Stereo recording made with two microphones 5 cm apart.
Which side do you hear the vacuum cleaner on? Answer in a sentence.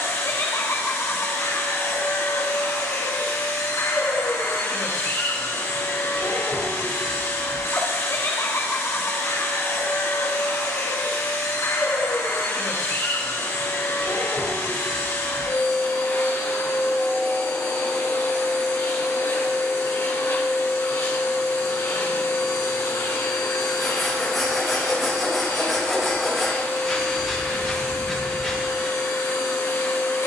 You can hear the vacuum cleaner on the left.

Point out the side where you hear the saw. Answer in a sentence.
In this clip you hear the saw in the centre.